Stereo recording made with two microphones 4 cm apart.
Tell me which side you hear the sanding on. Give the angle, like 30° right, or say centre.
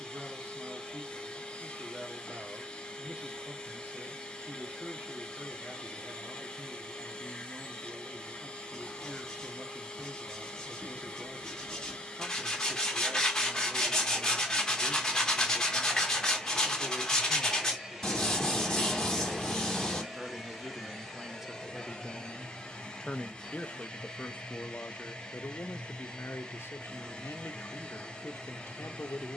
10° left.